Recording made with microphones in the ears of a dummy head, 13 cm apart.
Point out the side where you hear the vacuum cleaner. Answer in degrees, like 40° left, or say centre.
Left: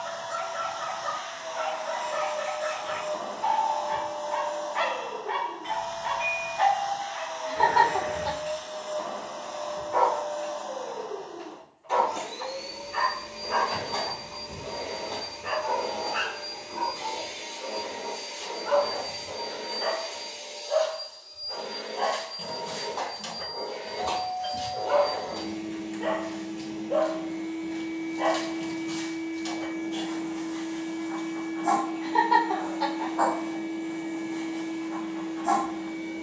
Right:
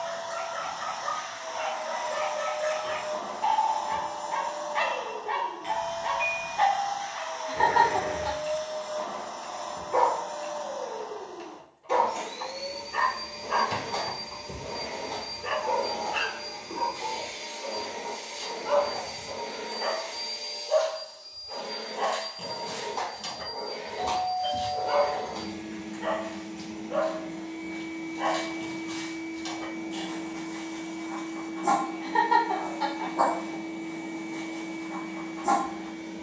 20° right.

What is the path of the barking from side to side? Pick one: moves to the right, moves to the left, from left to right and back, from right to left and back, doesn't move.
from right to left and back.